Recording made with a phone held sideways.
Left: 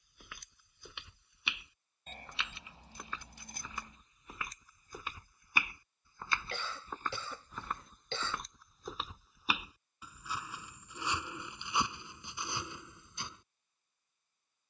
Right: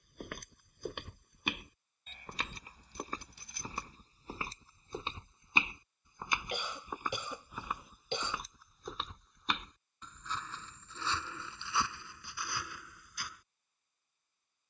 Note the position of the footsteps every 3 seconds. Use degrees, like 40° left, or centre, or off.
50° right, 30° right, 10° right, 10° left, 20° left.